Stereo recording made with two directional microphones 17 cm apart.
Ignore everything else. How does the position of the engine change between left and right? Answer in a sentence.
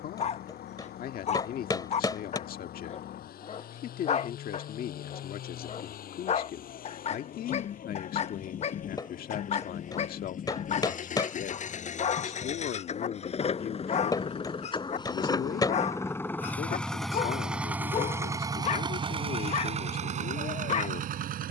In this clip you hear the engine travel towards the right.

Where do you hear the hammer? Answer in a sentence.
In this clip you hear the hammer on the left.